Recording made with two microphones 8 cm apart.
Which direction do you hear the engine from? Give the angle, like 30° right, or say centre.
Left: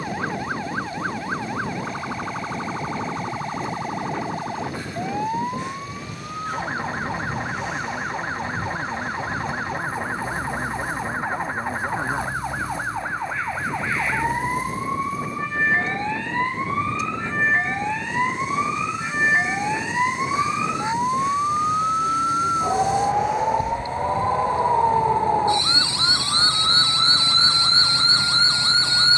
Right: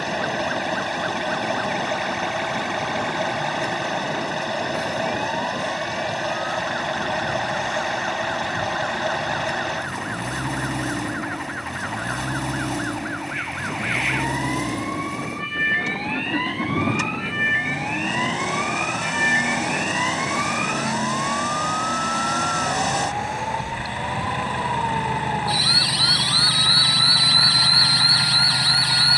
70° right.